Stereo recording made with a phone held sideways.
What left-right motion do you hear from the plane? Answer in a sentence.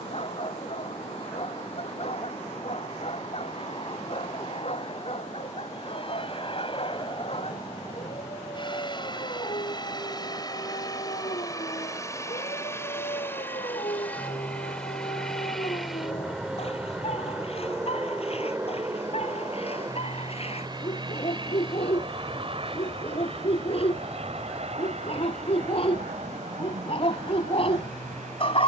In this clip you hear the plane move from left to right.